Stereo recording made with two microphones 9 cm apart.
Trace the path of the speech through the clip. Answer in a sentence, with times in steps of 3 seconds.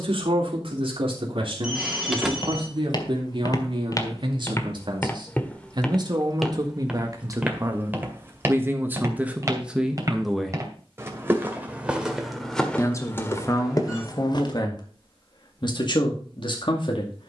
In this clip you hear the speech on the right from 0 s, in the centre from 9 s and on the left from 12 s.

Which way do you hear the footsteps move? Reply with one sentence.
In this clip you hear the footsteps move from left to right and back again.